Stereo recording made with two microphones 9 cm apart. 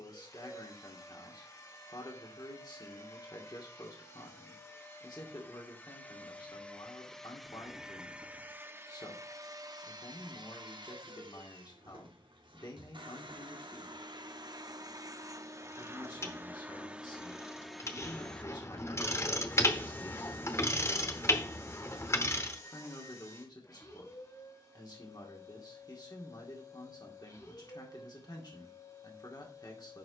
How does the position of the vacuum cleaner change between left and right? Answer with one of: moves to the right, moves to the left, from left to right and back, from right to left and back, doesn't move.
from left to right and back.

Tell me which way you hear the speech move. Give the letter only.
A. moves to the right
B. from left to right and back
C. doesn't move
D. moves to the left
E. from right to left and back
C.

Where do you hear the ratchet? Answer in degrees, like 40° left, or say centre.
30° left.